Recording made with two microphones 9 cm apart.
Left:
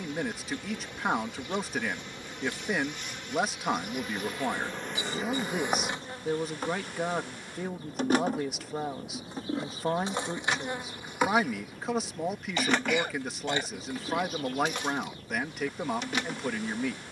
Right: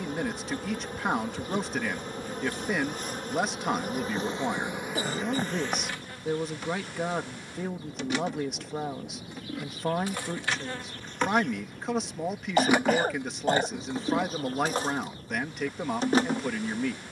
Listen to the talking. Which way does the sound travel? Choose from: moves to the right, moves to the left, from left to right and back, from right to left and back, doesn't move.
doesn't move.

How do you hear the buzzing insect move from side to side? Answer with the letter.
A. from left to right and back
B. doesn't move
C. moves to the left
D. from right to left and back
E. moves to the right
D.